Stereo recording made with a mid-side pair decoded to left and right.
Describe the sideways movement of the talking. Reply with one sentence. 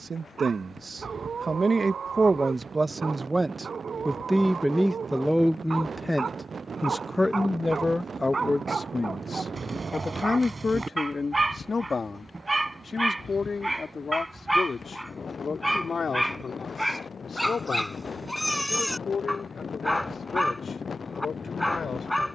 In this clip you hear the talking move to the left.